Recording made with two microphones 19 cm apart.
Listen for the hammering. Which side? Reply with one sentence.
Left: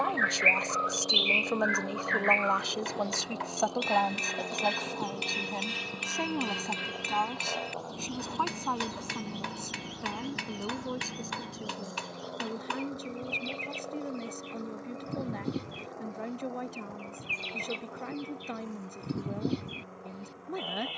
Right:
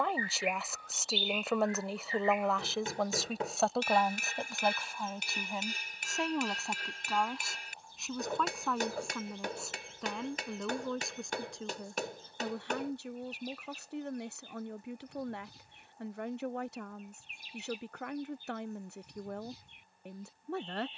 You can hear the hammering on the right.